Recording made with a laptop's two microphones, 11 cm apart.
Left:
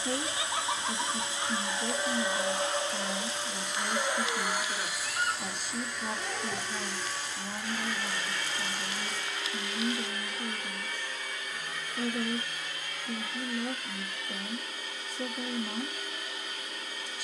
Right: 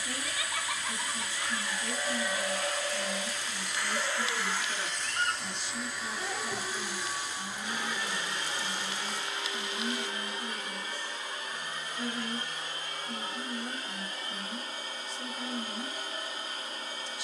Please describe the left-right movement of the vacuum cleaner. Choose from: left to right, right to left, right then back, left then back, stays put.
left to right.